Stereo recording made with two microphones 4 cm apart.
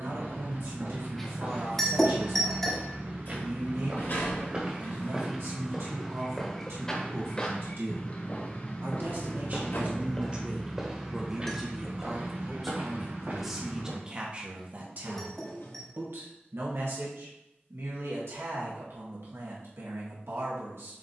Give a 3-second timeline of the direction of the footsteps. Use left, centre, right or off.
right, right, left, centre, right, off, off.